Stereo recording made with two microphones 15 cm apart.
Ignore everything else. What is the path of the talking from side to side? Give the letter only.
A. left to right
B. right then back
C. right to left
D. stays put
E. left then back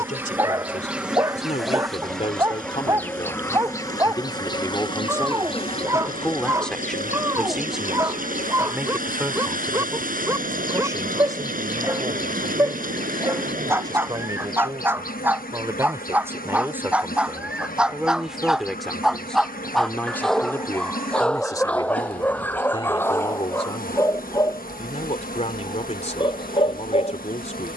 B.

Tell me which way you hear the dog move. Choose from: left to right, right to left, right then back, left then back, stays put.
right to left.